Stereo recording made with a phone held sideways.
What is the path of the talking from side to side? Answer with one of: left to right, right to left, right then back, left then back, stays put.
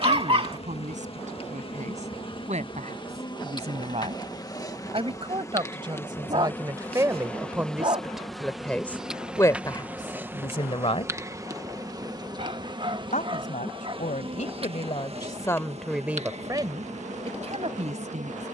left then back.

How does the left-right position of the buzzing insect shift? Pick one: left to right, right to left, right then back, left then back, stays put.
left to right.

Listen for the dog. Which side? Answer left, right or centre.
right.